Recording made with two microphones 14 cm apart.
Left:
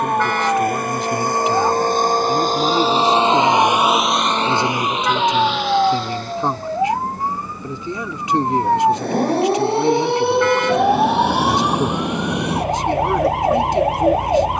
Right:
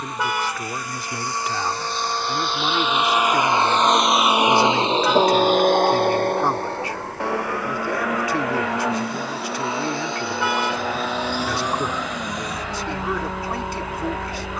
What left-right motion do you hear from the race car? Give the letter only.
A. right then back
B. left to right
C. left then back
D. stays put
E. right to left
B.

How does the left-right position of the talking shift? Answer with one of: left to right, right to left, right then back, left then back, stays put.
stays put.